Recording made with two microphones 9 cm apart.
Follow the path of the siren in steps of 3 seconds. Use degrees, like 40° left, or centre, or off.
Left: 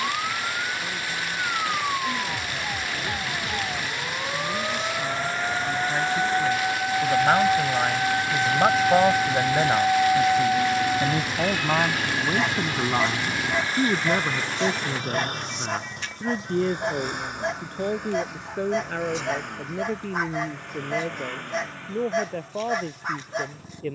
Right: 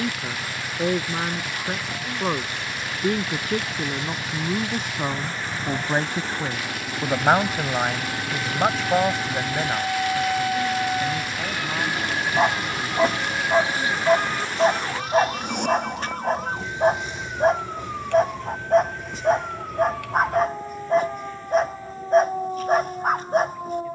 70° left, 70° left, 50° left, 10° left, 40° right, 60° right, 70° right, 70° right.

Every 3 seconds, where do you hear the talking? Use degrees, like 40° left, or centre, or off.
60° right, 50° right, 20° right, 30° left, 50° left, 60° left, 70° left, 70° left.